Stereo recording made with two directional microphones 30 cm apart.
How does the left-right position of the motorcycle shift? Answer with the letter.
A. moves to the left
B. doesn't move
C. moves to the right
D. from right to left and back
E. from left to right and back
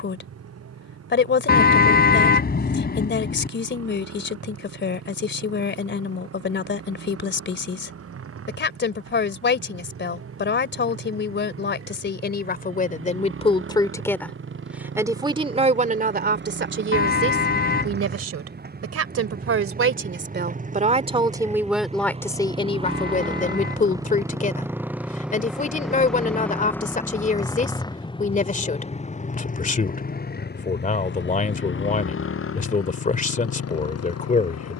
A.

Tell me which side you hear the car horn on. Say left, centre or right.
left.